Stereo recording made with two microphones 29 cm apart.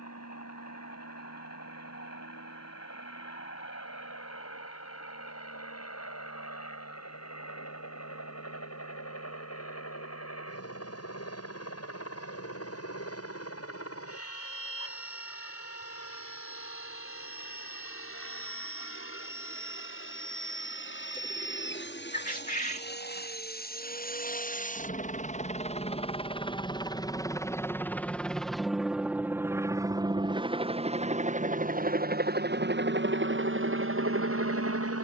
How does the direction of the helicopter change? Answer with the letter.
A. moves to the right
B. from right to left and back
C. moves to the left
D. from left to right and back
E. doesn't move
A.